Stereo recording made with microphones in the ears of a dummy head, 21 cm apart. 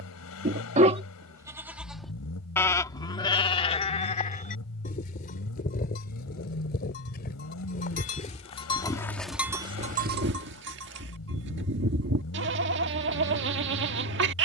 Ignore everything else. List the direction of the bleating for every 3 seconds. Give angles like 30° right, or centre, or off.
10° right, 30° left, 40° left, 40° right, 50° right.